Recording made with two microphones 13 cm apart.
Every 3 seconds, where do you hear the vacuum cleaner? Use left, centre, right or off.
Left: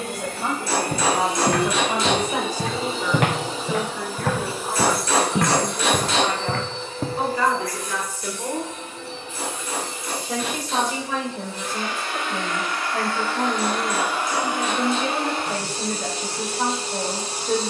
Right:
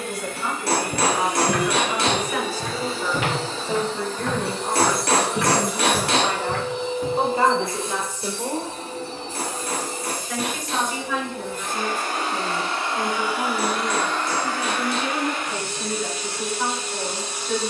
left, centre, right, right, centre, left.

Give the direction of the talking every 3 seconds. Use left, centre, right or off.
left, right, right, left, left, left.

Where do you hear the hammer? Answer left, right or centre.
right.